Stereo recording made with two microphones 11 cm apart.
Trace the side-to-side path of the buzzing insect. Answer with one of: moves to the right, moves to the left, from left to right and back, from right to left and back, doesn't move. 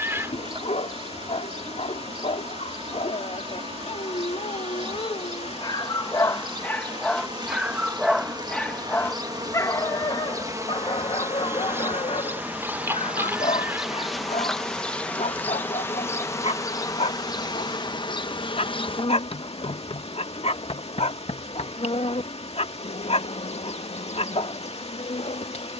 moves to the left.